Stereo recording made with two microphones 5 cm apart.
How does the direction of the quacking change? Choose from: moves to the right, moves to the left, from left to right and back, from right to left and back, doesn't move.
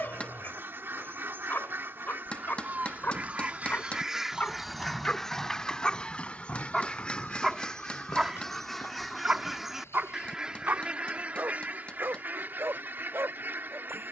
from right to left and back.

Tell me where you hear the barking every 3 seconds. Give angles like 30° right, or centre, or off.
40° left, 30° left, centre, 40° right, 70° right.